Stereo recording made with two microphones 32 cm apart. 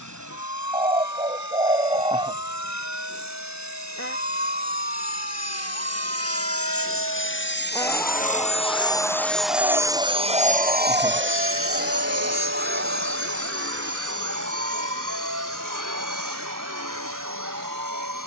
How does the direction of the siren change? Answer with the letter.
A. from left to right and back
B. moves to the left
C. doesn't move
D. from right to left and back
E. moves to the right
E.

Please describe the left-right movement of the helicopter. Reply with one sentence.
In this clip you hear the helicopter move from left to right.